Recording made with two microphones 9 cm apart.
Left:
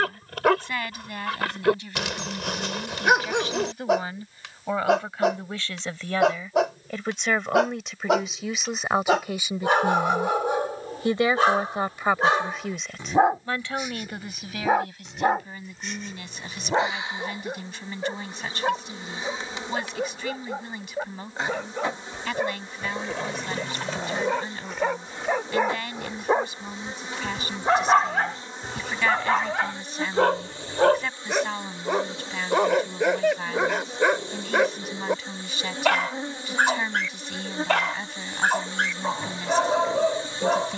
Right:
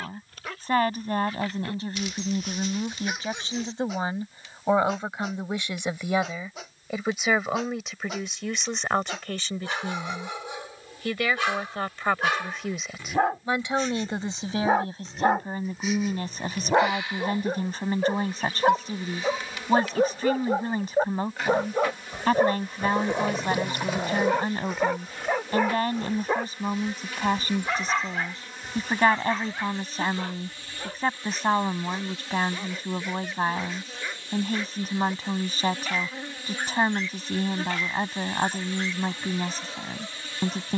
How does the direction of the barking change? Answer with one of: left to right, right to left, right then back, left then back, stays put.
right then back.